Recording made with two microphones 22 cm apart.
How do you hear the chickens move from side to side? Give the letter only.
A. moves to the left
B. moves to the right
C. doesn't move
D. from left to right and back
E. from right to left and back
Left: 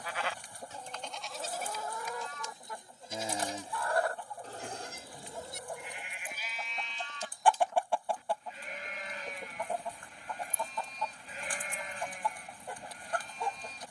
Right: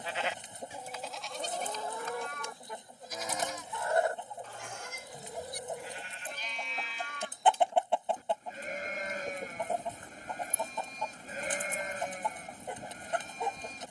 C.